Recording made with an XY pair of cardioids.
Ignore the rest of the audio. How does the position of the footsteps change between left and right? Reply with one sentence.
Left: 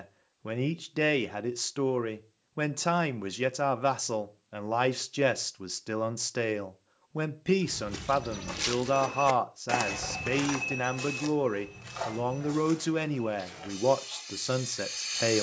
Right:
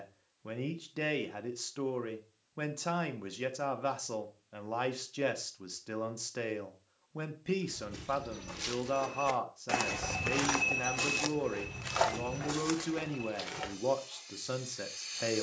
You can hear the footsteps go from the left side to the right.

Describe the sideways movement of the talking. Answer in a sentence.
You can hear the talking stay in one place.